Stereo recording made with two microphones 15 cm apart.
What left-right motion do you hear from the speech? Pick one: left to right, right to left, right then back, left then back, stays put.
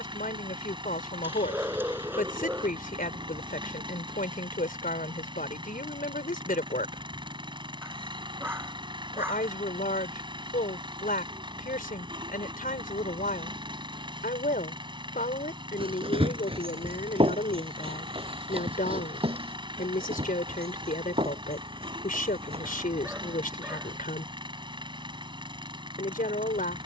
stays put.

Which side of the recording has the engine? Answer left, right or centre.
right.